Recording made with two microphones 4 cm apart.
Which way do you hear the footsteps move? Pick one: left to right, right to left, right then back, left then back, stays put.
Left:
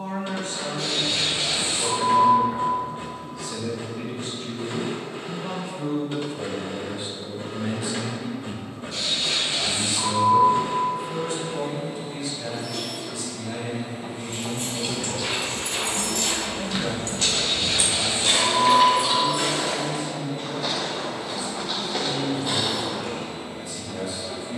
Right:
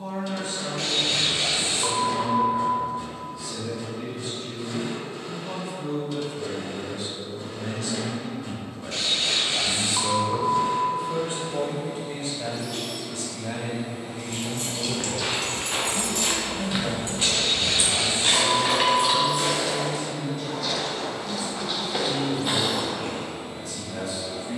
left then back.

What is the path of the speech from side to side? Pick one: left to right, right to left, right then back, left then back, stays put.
left to right.